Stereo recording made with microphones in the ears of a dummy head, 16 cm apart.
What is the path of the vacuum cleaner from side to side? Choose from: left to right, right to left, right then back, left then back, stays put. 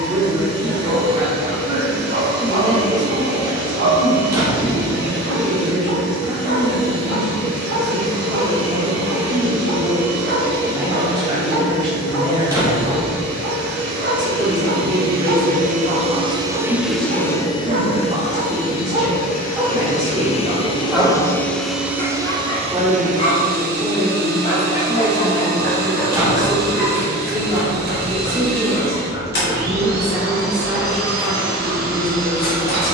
left then back.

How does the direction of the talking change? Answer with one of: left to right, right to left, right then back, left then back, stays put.
stays put.